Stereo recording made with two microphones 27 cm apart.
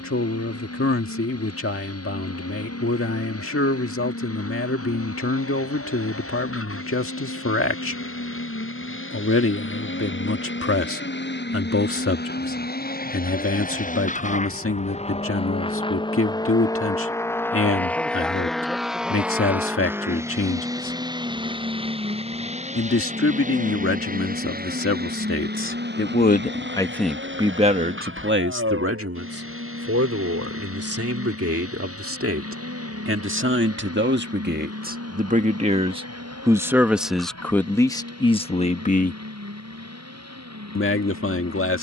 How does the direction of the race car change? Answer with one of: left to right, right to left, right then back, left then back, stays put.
left to right.